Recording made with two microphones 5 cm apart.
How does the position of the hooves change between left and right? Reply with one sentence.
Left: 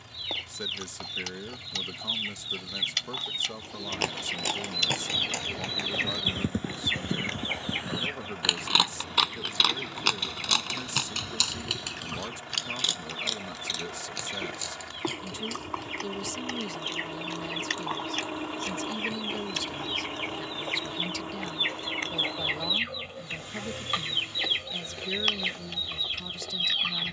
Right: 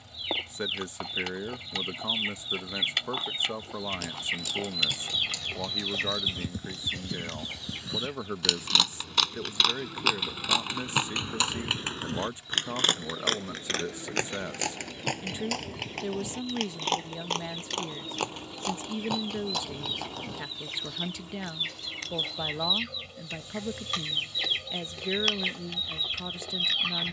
In this clip you hear the hooves travel towards the right.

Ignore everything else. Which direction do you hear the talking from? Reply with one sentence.
You can hear the talking on the right.